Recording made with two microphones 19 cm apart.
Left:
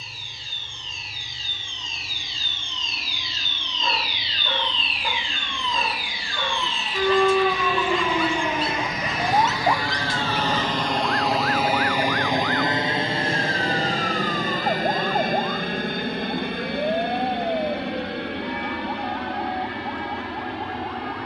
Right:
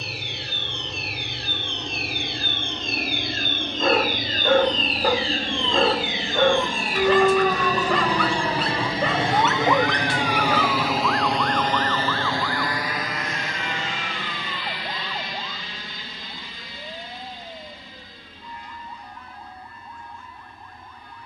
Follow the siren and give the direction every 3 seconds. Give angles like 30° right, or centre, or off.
70° right, 50° right, centre, 30° left, 50° left, 60° left, 60° left.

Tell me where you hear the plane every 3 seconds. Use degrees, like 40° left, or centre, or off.
70° right, 60° right, 50° right, 10° right, 30° left, 50° left, 70° left.